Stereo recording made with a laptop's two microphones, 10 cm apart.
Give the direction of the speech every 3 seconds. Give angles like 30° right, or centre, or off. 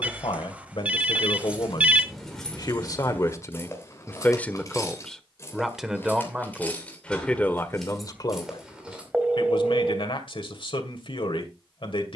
60° left, 20° left, 20° left, 60° left.